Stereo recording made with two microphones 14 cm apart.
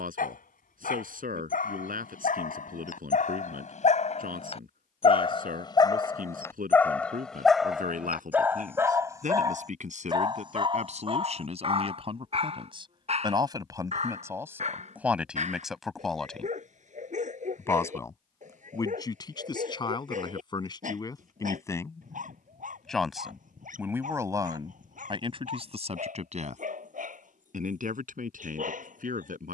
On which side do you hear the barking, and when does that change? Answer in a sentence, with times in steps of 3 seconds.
You can hear the barking on the left from 0 s, in the centre from 6 s and on the right from 9 s.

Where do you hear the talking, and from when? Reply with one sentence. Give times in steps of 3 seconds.
You can hear the talking on the right from 0 s, in the centre from 15 s, on the left from 18 s, in the centre from 21 s and on the right from 24 s.